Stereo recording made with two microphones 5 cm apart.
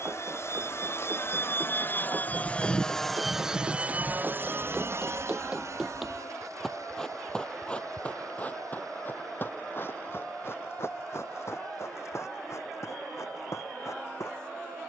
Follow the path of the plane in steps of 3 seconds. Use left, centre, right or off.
left, right, right, right, right.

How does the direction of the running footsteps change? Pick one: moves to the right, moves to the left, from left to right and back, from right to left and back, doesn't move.
moves to the left.